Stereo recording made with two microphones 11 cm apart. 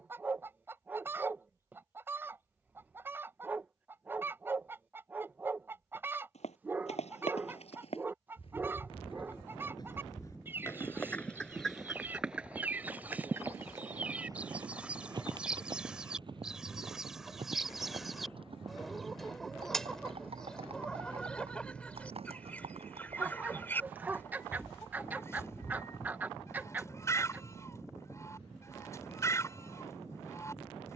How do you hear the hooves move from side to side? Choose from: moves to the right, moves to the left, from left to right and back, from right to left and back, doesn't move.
moves to the right.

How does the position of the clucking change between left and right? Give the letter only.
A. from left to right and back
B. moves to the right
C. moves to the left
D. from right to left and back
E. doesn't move
C.